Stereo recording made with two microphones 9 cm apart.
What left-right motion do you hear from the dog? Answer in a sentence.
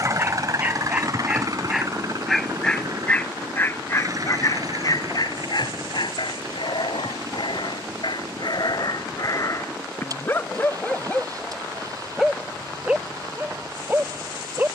You can hear the dog go left and come back.